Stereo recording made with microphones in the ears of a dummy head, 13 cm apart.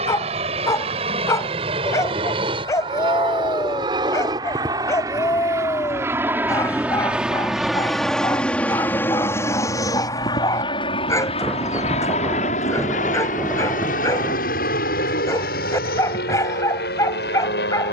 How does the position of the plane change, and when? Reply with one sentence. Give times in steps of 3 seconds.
You can hear the plane on the right from 0 s, in the centre from 6 s and on the left from 9 s.